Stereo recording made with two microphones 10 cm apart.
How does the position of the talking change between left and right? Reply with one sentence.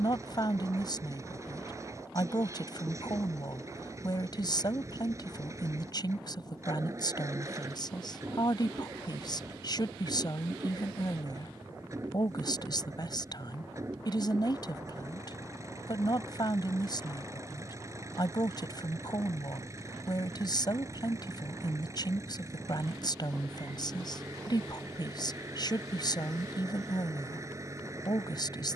In this clip you hear the talking stay put.